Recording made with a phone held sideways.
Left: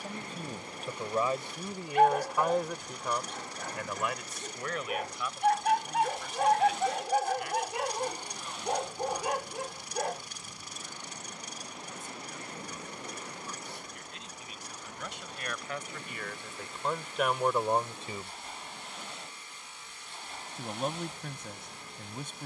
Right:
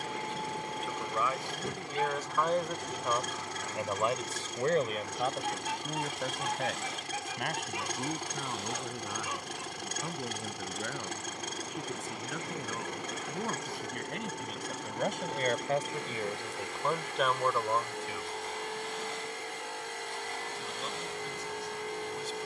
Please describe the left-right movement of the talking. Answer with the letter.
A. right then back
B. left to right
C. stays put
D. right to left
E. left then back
A.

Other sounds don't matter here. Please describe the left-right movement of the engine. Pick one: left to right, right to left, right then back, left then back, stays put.
stays put.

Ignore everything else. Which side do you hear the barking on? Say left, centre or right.
left.